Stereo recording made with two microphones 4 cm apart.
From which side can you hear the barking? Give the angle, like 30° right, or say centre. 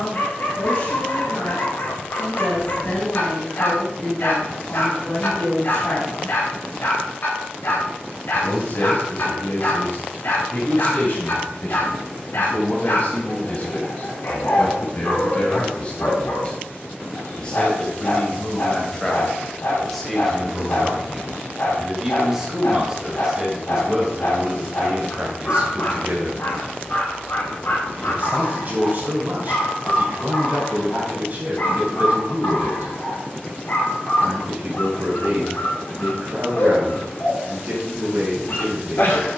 60° left.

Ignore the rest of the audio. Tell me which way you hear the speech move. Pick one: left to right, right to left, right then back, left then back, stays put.
left to right.